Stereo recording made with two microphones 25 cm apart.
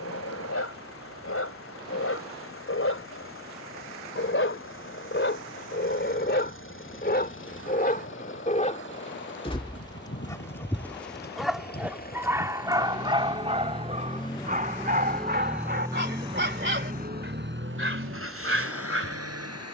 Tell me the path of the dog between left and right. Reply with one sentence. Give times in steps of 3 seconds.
You can hear the dog on the left from 0 s, in the centre from 9 s and on the right from 12 s.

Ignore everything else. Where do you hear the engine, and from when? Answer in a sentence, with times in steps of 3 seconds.
You can hear the engine on the left from 0 s and on the right from 15 s.